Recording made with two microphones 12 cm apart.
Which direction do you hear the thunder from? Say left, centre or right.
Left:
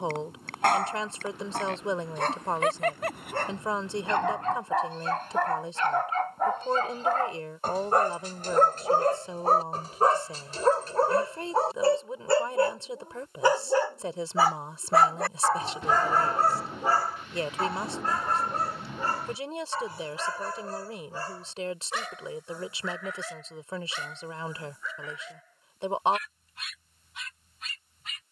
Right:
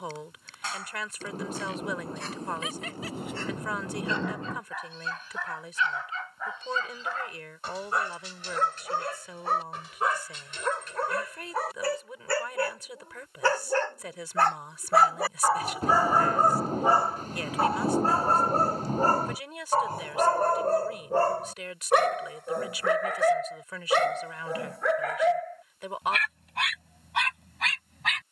right.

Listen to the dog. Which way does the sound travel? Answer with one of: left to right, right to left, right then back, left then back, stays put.
left to right.